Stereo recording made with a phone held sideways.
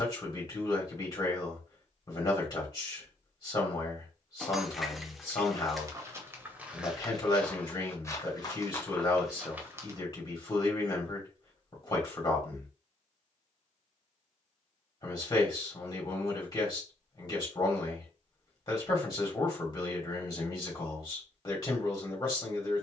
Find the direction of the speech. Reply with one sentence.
In this clip you hear the speech on the left.